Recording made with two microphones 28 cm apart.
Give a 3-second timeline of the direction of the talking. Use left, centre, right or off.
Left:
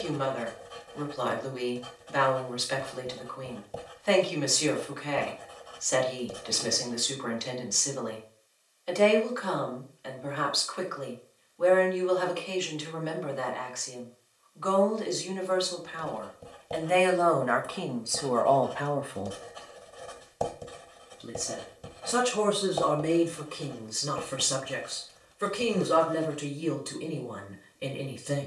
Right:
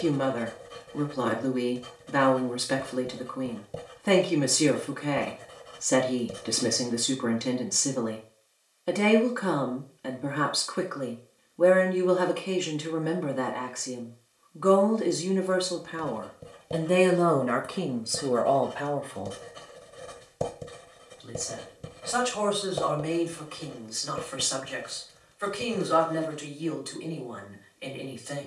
right, right, right, right, right, right, centre, left, left, left.